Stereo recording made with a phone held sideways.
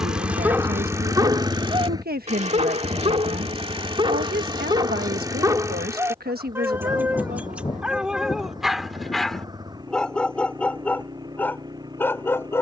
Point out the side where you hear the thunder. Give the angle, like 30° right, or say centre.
30° left.